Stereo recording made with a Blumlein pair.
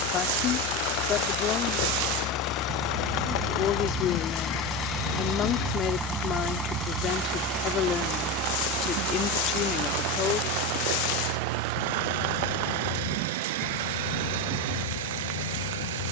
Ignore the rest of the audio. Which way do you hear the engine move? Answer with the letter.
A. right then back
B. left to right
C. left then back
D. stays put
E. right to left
B.